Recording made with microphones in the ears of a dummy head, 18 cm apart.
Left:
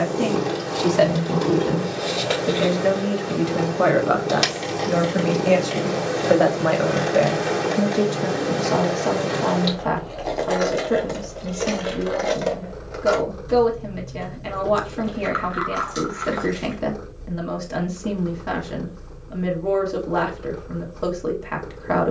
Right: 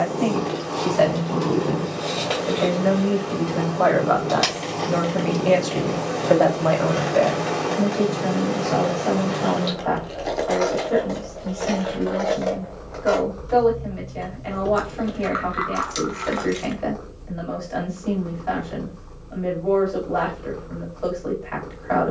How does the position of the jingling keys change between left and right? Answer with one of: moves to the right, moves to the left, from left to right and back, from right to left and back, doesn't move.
from right to left and back.